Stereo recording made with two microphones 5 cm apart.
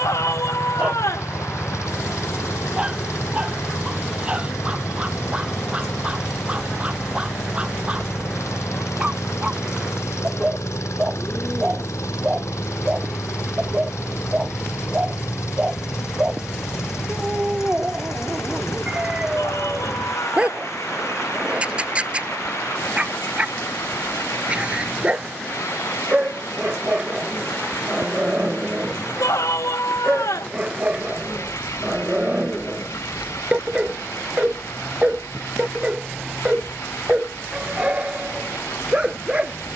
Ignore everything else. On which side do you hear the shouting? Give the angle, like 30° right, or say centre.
80° left.